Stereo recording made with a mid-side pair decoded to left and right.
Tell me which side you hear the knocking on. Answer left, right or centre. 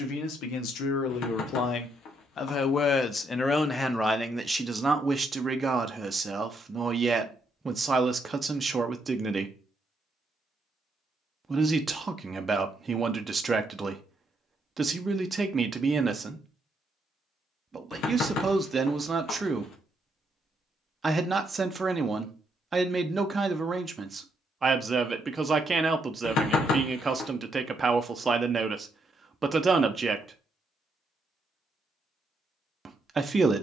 left.